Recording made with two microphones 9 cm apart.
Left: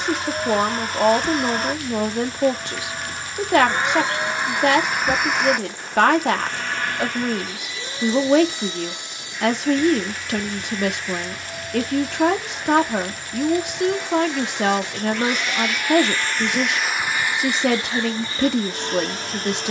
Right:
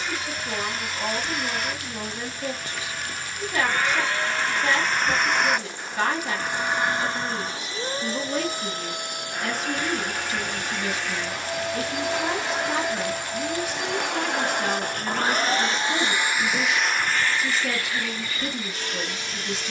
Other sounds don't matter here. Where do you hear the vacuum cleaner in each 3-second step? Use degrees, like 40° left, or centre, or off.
40° left, 10° left, 30° right, 60° right, 70° right, 10° right, 40° left.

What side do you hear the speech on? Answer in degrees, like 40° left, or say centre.
70° left.